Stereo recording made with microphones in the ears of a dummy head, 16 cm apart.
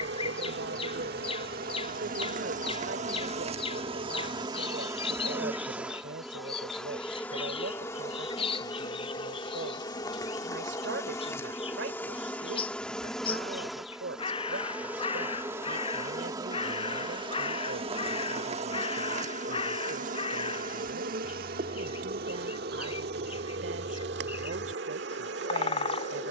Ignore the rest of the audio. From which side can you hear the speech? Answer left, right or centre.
right.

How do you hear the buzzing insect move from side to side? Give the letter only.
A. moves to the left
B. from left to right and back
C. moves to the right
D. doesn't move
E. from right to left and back
E.